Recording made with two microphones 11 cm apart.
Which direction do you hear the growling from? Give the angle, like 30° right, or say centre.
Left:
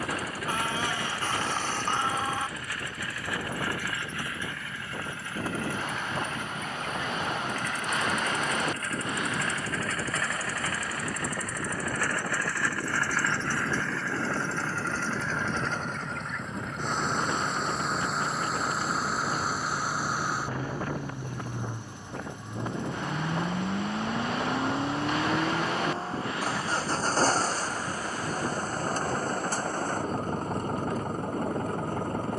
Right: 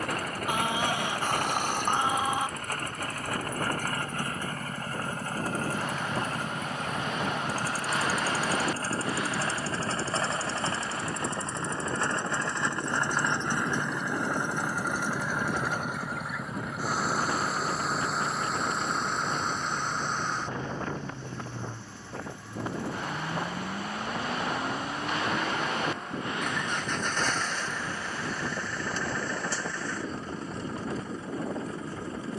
20° right.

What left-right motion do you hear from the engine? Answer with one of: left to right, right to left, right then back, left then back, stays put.
right to left.